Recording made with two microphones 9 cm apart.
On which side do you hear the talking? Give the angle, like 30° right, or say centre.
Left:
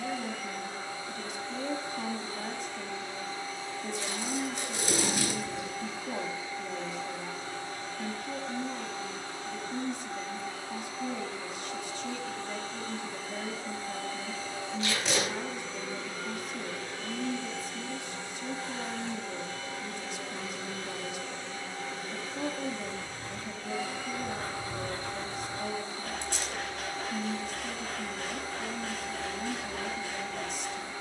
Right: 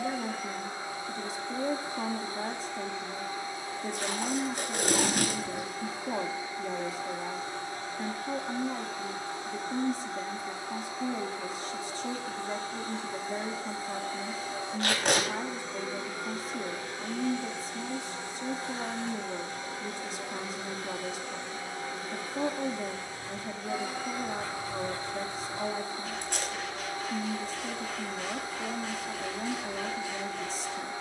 30° right.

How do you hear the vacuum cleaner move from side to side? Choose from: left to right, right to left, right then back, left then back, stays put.
stays put.